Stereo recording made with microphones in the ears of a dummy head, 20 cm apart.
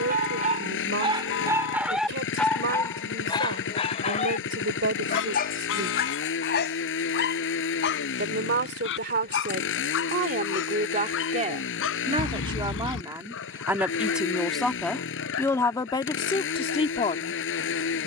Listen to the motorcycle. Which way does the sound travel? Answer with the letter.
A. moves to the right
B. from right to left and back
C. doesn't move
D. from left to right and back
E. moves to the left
C.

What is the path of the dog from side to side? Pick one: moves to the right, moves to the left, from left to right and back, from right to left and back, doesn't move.
moves to the left.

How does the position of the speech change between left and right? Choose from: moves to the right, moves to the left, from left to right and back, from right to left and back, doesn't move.
moves to the left.